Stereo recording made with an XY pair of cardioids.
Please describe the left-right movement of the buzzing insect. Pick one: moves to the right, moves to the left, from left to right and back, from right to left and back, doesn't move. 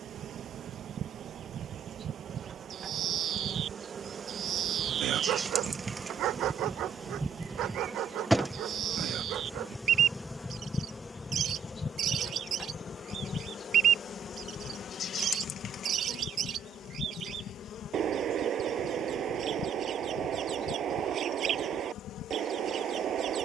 moves to the left.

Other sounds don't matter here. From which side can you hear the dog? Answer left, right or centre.
right.